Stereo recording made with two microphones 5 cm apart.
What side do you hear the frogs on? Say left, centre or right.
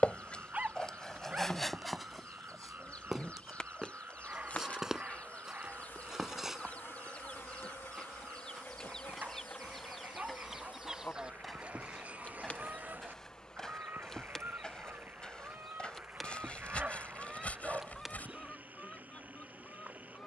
right.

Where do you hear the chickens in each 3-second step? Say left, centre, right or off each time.
left, left, left, centre, right, right, left.